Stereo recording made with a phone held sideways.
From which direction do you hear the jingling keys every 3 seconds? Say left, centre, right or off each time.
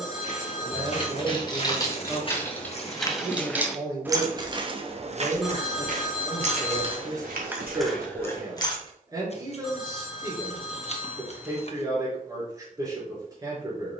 left, right, centre, off, off.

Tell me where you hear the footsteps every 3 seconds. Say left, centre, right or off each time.
left, right, right, off, off.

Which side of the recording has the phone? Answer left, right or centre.
centre.